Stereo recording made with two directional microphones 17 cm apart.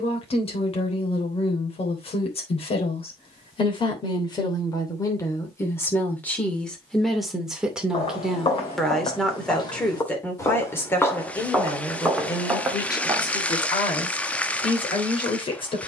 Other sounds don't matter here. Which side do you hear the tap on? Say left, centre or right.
centre.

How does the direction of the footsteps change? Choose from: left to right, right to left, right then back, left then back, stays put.
left to right.